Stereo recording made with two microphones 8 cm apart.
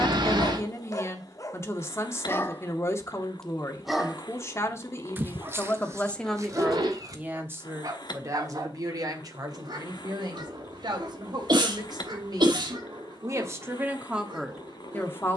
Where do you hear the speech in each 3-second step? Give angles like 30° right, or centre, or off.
30° left, 30° left, 20° right, 60° right, 30° right.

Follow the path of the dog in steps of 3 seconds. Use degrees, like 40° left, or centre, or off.
40° left, 20° right, 50° right, 60° right, 70° right.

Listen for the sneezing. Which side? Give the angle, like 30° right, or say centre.
70° right.